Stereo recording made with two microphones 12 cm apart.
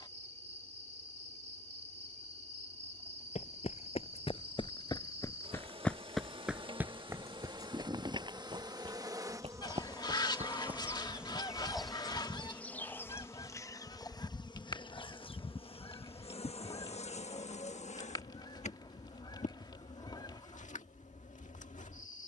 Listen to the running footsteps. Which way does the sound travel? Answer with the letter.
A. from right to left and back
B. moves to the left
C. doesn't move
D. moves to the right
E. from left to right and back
D.